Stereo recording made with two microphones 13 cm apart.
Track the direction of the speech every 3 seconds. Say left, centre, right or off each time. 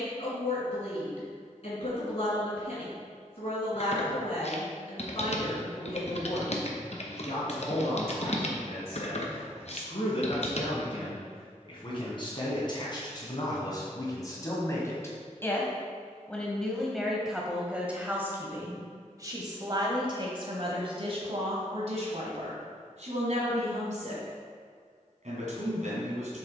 left, left, left, left, left, centre, right, right, right.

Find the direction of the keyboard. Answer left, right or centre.
left.